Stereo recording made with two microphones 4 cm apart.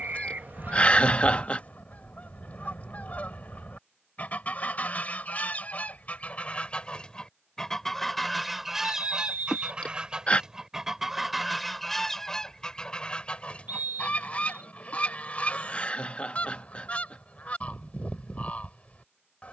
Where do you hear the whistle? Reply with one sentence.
You can hear the whistle on the right.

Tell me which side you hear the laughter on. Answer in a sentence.
In this clip you hear the laughter on the left.